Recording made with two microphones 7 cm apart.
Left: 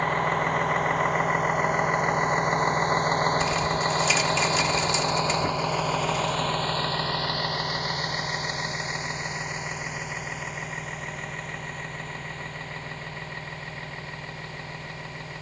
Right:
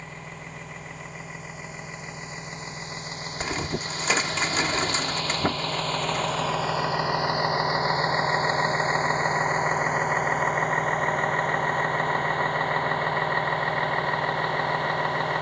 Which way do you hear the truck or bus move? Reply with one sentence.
You can hear the truck or bus go from the left side to the right.